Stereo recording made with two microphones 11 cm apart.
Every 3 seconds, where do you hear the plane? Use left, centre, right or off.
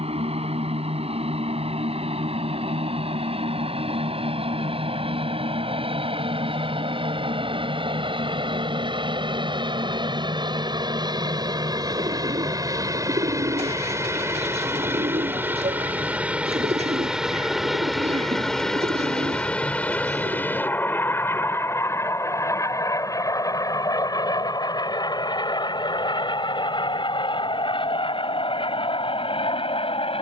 right, right, right, right, right, centre, centre, left, left, left.